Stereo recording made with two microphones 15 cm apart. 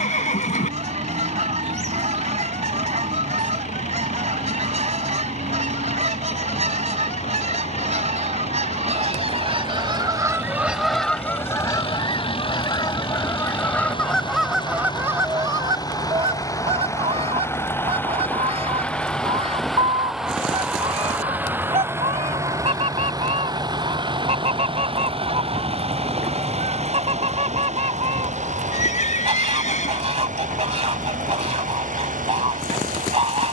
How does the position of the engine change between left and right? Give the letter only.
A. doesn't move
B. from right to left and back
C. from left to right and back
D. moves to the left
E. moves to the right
E.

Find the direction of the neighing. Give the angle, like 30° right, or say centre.
60° left.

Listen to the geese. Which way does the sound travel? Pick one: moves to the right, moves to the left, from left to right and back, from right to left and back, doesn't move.
from right to left and back.